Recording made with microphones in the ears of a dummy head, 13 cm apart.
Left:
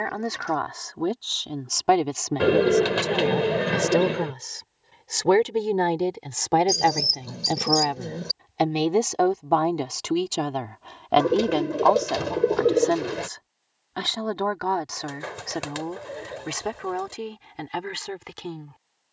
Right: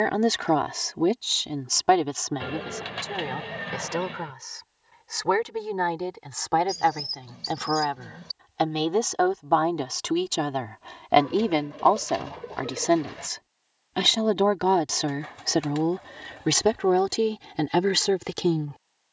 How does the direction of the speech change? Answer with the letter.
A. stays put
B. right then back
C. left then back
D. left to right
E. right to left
C.